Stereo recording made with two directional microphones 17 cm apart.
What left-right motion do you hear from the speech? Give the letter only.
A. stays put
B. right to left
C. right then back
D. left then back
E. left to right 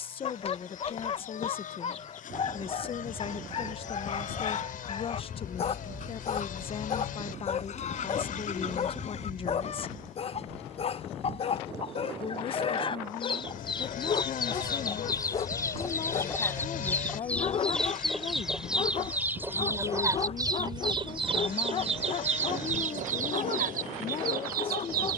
A.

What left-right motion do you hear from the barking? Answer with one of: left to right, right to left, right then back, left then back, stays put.
stays put.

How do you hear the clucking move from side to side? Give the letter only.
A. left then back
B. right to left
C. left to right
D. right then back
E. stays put
C.